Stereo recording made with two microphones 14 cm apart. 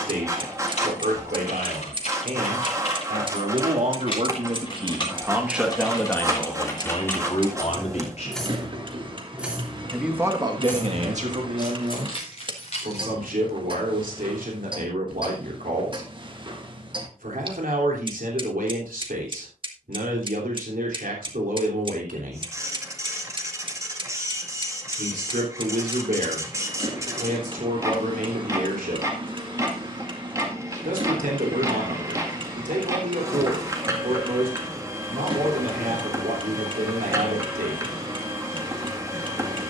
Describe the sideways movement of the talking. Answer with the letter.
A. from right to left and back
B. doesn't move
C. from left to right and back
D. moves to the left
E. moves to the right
A.